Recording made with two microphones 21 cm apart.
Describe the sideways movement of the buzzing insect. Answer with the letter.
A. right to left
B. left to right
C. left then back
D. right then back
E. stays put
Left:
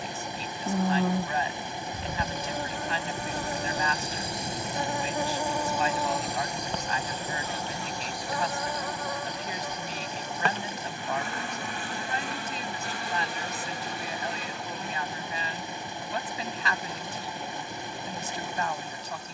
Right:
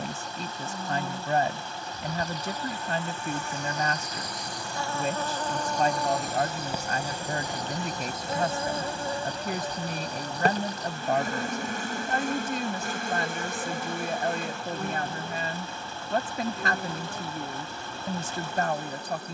B.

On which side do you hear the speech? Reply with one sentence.
You can hear the speech on the right.